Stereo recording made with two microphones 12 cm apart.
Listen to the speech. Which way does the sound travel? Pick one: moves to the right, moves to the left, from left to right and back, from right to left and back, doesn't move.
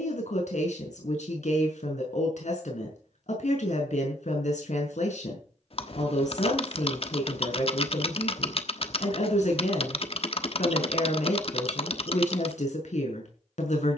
doesn't move.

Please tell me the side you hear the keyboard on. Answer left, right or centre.
left.